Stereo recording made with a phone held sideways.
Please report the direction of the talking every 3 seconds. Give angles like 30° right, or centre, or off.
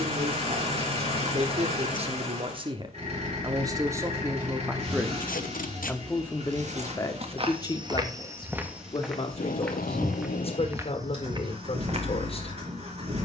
40° right, 20° right, 20° left, 40° left, 40° left.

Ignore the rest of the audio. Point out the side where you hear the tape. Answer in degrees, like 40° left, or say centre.
80° left.